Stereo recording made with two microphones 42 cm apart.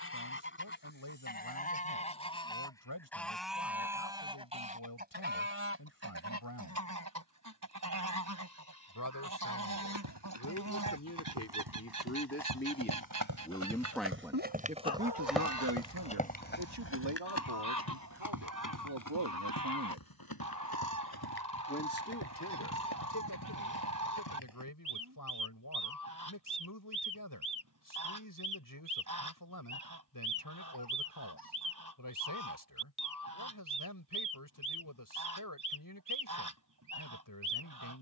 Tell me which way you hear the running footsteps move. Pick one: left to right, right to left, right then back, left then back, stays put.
right to left.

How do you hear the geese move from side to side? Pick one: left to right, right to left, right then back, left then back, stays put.
left to right.